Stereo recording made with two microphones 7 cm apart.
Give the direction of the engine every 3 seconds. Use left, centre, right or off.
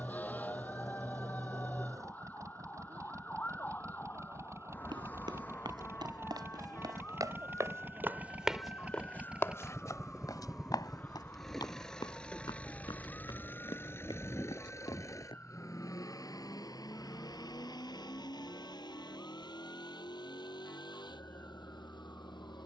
right, right, right, centre, left, left, left, left.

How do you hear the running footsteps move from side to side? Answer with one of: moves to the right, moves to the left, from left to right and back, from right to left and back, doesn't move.
moves to the left.